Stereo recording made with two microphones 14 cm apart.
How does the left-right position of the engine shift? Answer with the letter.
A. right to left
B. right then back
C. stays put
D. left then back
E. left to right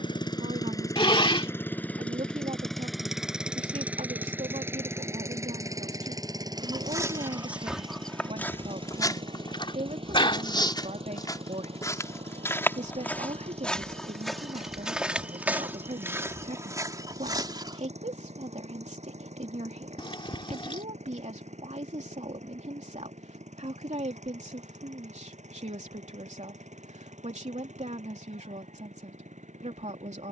E.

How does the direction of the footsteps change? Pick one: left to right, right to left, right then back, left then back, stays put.
left then back.